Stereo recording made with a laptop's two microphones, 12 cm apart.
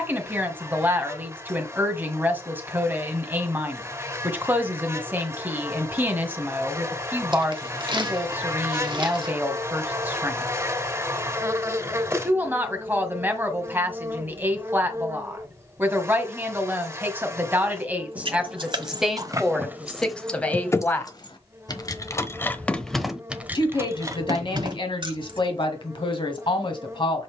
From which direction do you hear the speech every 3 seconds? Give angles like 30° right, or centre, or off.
20° right, 20° right, 20° right, 20° right, 20° right, 20° right, centre, 40° left, 50° left.